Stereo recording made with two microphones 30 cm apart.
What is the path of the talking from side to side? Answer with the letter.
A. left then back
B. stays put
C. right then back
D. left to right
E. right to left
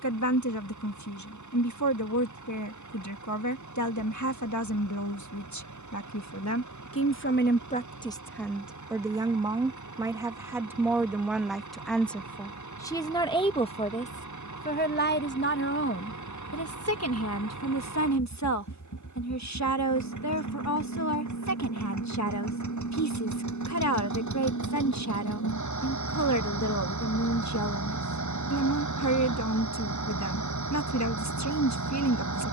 C.